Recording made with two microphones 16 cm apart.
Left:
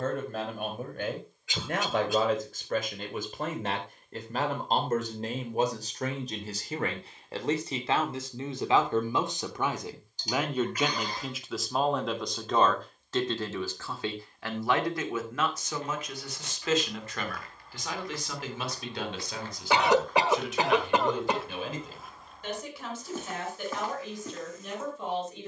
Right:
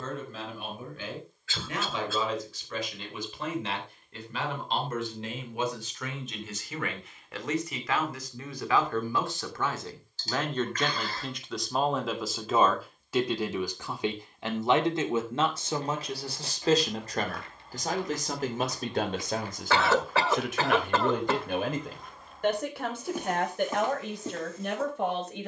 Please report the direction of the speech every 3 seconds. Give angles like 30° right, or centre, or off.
50° left, 50° left, 30° left, 10° left, 10° right, 30° right, 50° right, 60° right, 60° right.